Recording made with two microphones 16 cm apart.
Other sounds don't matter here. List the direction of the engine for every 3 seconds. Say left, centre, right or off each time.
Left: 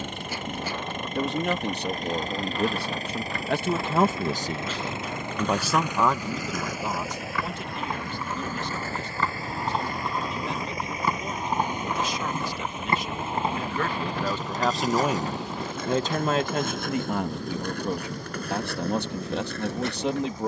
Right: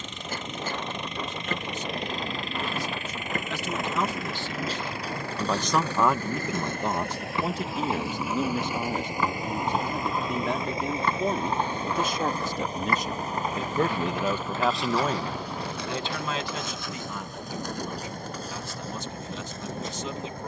left, left, centre, right, right, right, right.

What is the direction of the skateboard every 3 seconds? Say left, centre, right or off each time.
right, right, right, centre, left, left, left.